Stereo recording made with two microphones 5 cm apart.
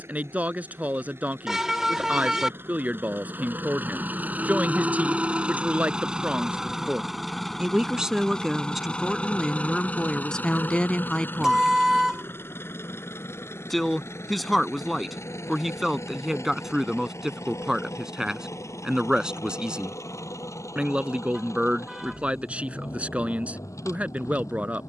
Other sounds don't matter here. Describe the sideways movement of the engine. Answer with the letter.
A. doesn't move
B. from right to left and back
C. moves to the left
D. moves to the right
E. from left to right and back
C.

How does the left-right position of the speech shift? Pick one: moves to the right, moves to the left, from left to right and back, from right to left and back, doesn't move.
from right to left and back.